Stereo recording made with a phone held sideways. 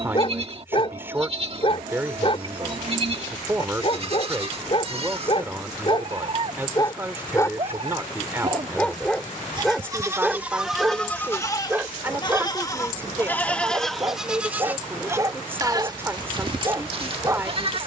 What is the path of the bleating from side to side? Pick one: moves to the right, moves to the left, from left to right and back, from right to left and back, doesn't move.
from right to left and back.